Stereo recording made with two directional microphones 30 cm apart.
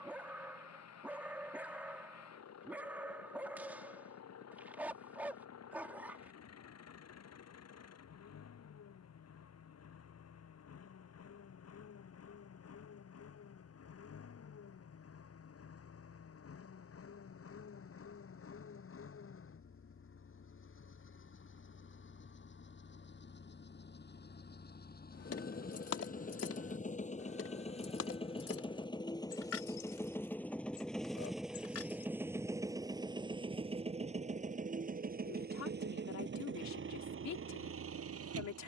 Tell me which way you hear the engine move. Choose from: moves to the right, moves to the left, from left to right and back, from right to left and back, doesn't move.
moves to the right.